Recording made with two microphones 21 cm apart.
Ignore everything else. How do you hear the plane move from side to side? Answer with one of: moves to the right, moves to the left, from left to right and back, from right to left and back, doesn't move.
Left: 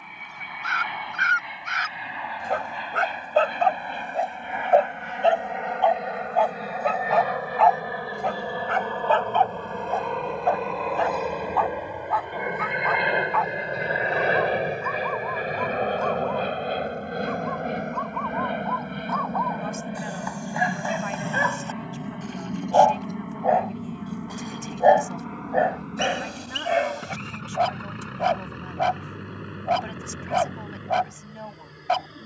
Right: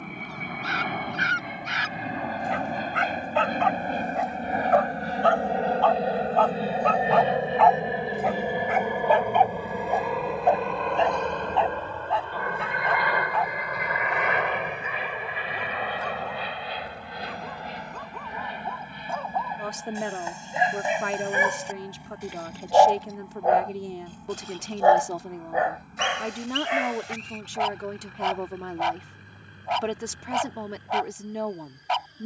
moves to the left.